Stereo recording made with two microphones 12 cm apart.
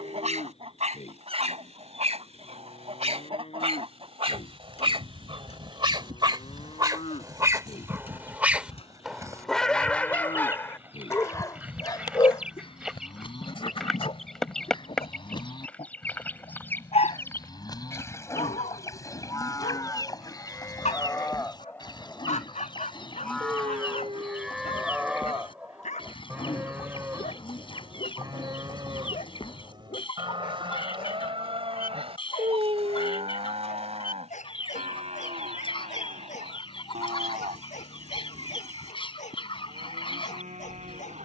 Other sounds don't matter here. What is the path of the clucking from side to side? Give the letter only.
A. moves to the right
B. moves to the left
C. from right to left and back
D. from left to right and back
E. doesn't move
B.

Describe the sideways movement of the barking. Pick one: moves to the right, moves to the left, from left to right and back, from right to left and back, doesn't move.
moves to the left.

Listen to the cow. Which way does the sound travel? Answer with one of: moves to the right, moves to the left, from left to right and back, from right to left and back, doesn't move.
moves to the right.